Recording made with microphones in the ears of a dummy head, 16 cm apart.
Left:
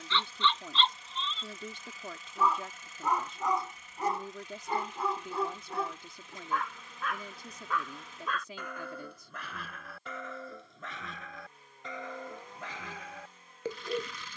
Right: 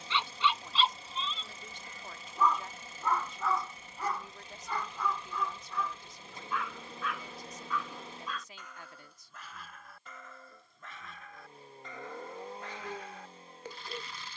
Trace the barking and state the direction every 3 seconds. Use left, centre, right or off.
centre, left, left, left, left.